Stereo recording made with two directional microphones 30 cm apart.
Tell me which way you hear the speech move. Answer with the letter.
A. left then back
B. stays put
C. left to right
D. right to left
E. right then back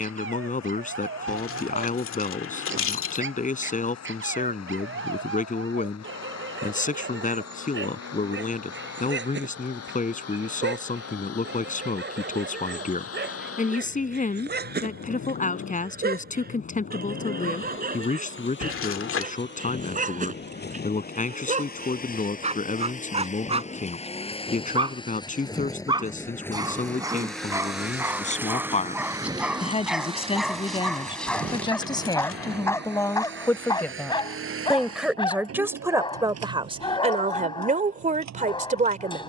C.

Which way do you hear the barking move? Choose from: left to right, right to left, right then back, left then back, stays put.
right to left.